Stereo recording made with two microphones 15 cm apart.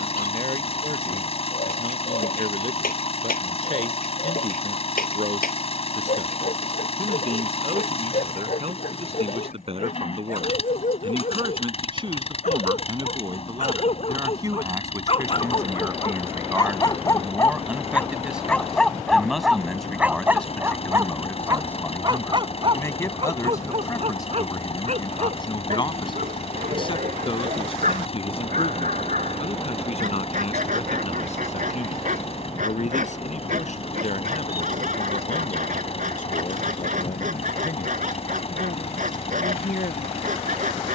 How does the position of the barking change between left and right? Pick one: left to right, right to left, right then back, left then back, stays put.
left to right.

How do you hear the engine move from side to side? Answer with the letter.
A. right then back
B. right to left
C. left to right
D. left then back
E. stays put
E.